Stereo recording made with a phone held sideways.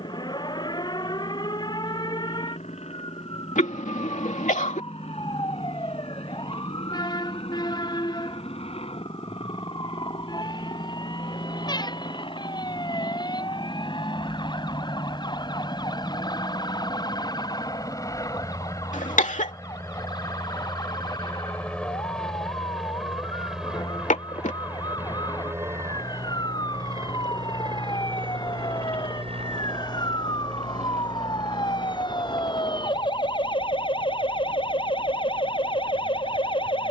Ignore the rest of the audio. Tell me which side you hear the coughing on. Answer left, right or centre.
left.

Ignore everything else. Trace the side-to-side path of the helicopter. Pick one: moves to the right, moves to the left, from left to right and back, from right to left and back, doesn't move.
moves to the right.